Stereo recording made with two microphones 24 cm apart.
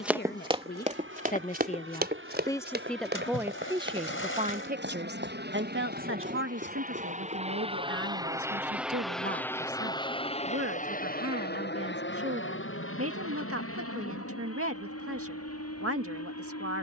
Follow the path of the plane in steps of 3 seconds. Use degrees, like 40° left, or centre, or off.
70° right, 60° right, 30° right, 30° left, 60° left, 70° left.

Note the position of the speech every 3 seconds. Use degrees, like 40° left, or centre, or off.
30° left, 30° right, 70° right, 70° right, 70° right, 70° right.